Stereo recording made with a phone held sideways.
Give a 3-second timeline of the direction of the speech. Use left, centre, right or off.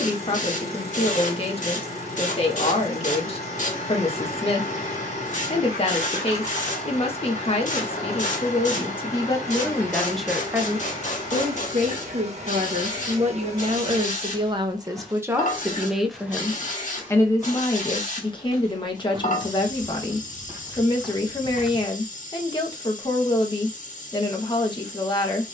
left, left, left, centre, right, centre, left, left, left.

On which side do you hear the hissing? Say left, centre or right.
left.